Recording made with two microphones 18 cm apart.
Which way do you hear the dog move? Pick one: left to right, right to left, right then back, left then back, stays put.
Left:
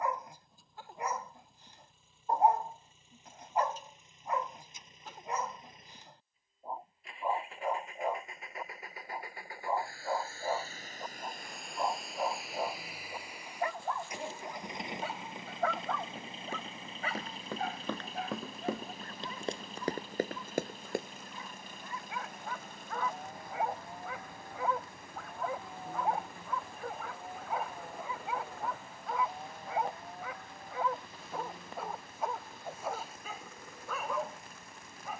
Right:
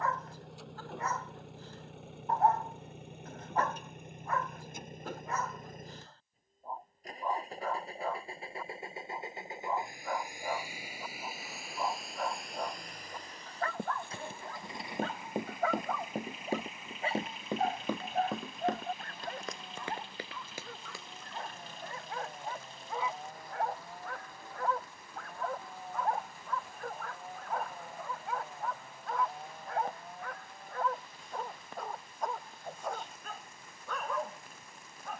right then back.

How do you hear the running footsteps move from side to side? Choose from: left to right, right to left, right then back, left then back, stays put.
right to left.